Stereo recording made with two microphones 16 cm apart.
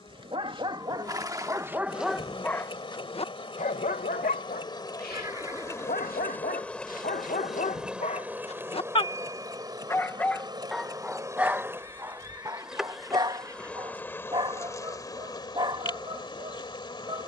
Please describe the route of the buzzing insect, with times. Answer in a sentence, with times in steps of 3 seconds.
You can hear the buzzing insect on the left from 0 s, in the centre from 6 s, on the right from 9 s, in the centre from 12 s and on the left from 15 s.